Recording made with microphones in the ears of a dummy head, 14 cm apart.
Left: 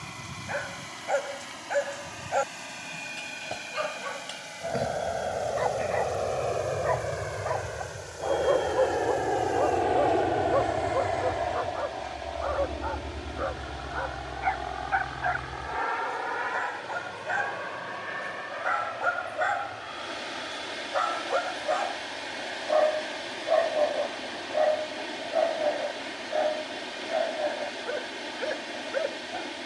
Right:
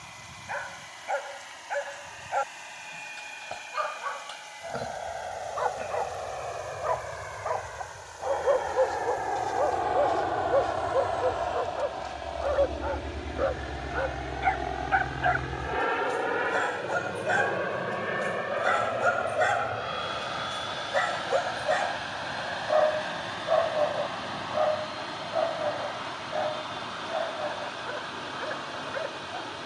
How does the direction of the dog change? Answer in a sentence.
You can hear the dog move from left to right and back again.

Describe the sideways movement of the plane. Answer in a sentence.
In this clip you hear the plane travel towards the right.